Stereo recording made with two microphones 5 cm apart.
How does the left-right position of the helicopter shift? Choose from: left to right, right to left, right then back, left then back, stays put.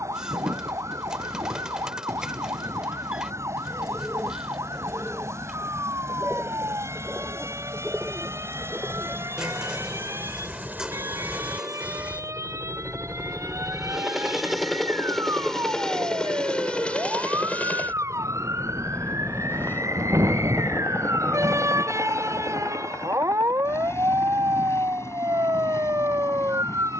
right to left.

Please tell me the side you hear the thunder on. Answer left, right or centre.
right.